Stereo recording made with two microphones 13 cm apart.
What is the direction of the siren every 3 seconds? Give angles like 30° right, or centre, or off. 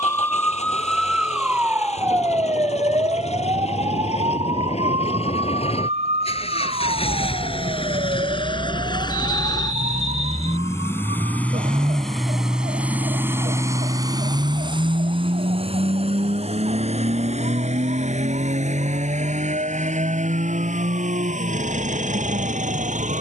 10° right, 40° right, 60° right, 60° right, 60° right, 70° right, 70° right, 70° right.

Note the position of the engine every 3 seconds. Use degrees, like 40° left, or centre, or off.
60° left, 60° left, 50° left, 20° left, 20° right, 60° right, 70° right, 80° right.